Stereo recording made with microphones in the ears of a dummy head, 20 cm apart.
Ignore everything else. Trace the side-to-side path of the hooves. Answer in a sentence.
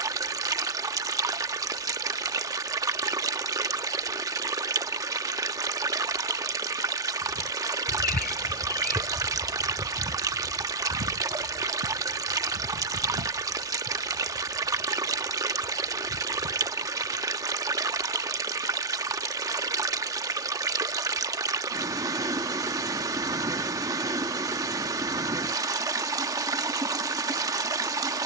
You can hear the hooves go from the left side to the right.